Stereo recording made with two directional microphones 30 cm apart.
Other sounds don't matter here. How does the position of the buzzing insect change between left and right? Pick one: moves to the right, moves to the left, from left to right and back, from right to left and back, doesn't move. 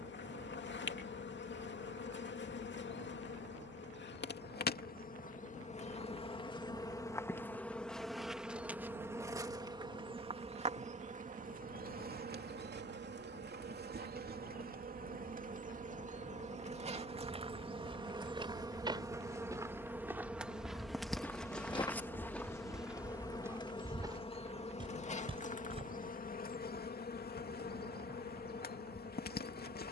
from left to right and back.